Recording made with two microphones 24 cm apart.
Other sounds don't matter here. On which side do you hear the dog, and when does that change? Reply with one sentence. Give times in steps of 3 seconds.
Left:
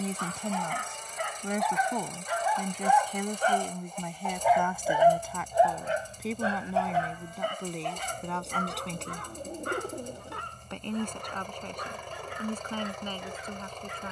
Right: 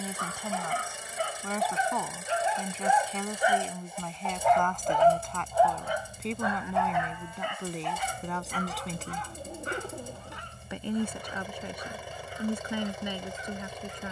You can hear the dog on the right from 0 s, in the centre from 3 s and on the left from 6 s.